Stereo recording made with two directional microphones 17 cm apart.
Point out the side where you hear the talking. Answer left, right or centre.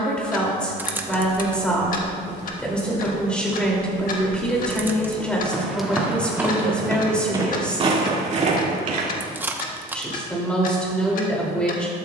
centre.